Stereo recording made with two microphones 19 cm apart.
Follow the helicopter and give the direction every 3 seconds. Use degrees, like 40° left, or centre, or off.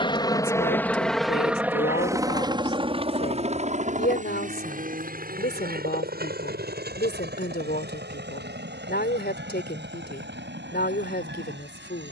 centre, 40° right, 60° right, 60° right.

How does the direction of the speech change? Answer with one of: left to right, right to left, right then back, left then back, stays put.
stays put.